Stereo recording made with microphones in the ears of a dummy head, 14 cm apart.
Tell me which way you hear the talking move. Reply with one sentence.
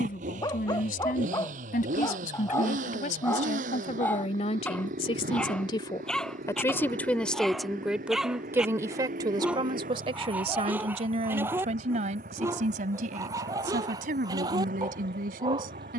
In this clip you hear the talking go from the left side to the right.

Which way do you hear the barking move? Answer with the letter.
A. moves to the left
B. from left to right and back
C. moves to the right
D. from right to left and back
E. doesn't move
C.